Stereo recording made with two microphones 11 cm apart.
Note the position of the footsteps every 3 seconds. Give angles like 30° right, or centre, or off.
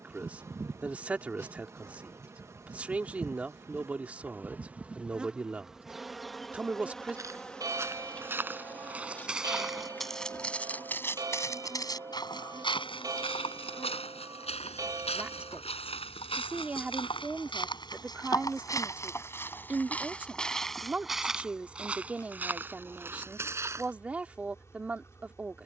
off, off, 20° right, 10° left, 60° left, 60° left, 20° left, 10° right, off.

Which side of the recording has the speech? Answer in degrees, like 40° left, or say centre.
10° right.